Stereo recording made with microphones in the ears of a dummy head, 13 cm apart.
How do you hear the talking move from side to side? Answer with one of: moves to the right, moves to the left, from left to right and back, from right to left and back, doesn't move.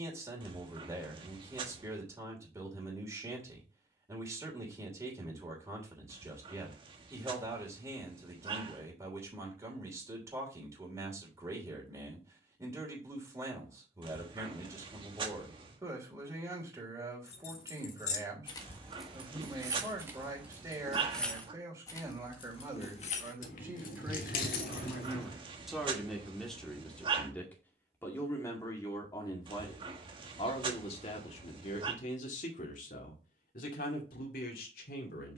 moves to the left.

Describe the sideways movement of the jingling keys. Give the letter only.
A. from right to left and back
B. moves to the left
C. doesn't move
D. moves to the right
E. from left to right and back
E.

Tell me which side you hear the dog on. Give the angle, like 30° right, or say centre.
30° right.